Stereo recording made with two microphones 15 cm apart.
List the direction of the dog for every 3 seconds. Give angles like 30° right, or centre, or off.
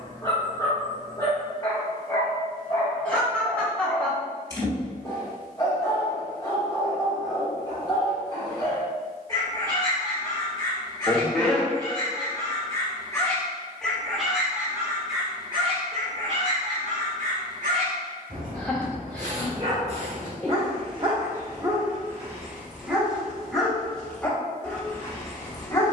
20° left, 20° left, 20° left, 20° left, 10° left, 50° right, 50° right, 10° right, 20° left.